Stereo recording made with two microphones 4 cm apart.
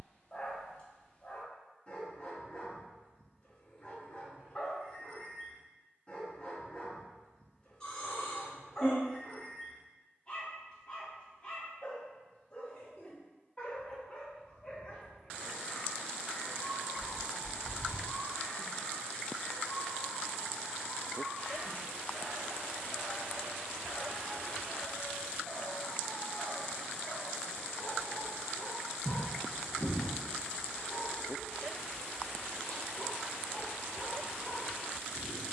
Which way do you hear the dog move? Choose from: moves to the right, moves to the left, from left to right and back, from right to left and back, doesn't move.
doesn't move.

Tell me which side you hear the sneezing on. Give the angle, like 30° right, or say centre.
20° left.